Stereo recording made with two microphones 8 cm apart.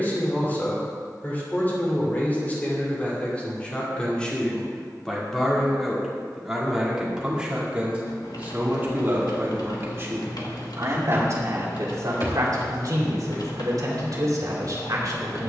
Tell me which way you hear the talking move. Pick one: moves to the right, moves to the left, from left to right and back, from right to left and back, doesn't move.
moves to the right.